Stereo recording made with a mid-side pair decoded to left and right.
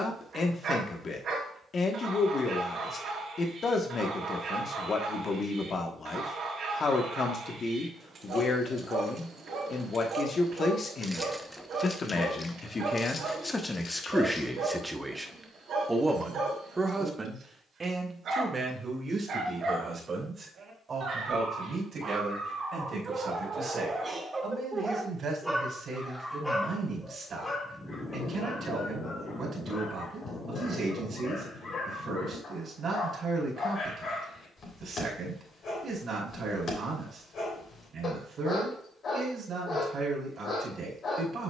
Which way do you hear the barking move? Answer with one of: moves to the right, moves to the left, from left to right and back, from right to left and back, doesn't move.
moves to the left.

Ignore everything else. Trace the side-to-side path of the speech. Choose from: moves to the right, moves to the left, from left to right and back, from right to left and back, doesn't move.
moves to the right.